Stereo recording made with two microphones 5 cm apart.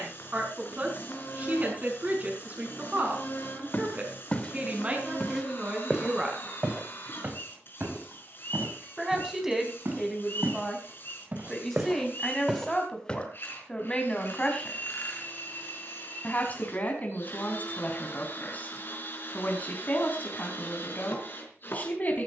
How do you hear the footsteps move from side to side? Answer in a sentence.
In this clip you hear the footsteps move from left to right and back again.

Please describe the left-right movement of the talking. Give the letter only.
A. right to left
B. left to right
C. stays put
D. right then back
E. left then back
A.